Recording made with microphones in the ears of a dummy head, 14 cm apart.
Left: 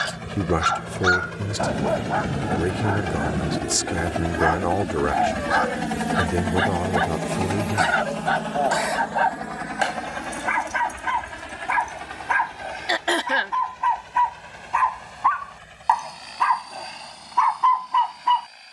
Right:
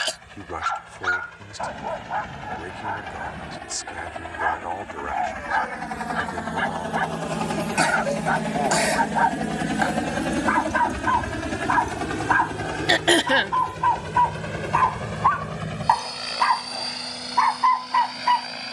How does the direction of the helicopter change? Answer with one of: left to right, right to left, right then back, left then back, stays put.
left to right.